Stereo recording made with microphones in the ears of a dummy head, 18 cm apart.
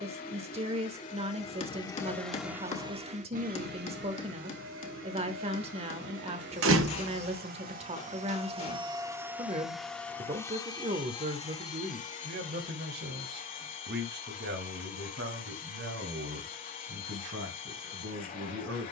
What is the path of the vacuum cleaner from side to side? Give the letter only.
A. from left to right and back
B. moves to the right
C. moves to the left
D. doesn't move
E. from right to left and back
A.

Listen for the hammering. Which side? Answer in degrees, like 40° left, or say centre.
30° left.